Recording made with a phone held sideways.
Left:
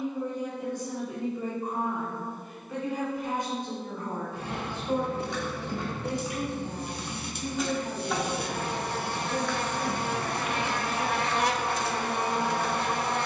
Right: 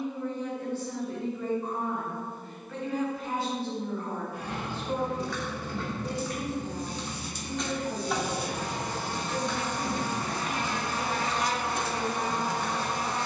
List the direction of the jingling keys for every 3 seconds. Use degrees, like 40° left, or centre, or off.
off, 20° left, centre, 40° right, 70° right.